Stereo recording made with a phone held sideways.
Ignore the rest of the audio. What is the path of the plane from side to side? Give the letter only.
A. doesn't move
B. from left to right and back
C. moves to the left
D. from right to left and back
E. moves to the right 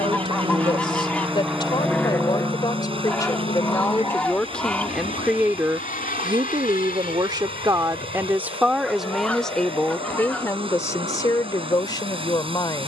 C.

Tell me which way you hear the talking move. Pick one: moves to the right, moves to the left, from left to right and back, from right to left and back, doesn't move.
from left to right and back.